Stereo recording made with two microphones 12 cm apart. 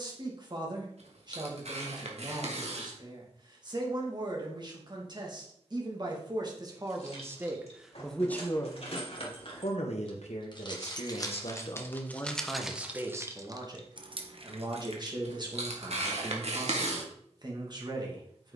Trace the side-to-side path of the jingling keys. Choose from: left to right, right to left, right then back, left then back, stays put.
left to right.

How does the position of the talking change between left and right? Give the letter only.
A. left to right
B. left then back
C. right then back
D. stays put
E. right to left
B.